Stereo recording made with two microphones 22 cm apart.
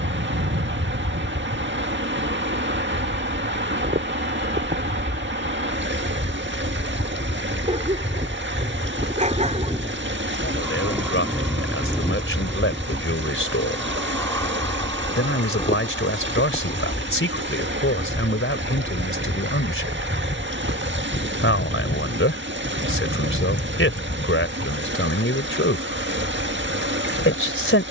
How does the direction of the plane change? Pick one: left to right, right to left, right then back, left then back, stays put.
right to left.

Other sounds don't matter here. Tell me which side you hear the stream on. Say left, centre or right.
right.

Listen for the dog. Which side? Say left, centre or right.
right.